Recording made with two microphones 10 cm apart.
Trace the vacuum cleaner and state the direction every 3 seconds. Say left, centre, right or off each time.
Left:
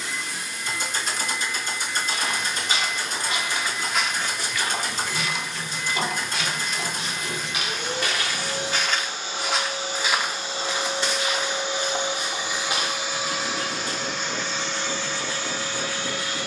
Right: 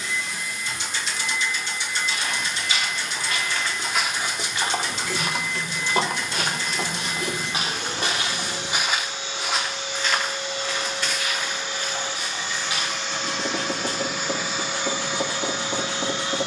left, left, left, left, centre, right.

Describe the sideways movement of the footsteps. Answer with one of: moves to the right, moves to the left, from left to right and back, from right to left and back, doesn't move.
from left to right and back.